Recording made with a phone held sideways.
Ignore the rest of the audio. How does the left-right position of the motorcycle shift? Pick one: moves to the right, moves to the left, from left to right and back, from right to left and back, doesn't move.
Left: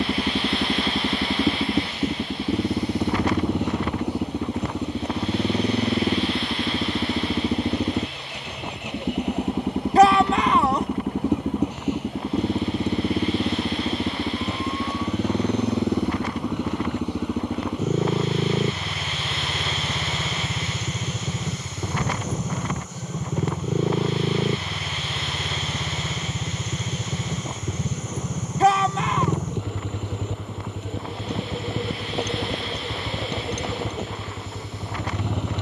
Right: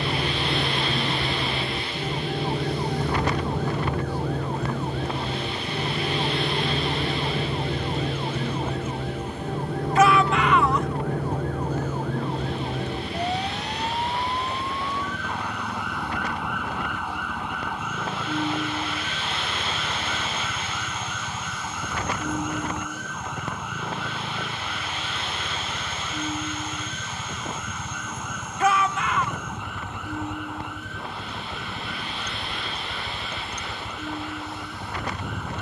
doesn't move.